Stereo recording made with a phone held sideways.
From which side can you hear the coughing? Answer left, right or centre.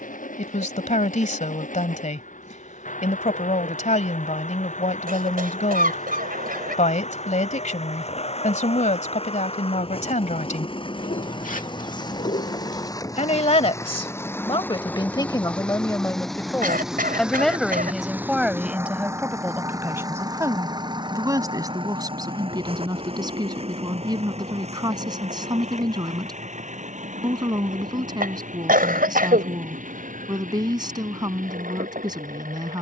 right.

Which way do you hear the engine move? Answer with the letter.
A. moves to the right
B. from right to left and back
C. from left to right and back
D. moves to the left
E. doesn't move
A.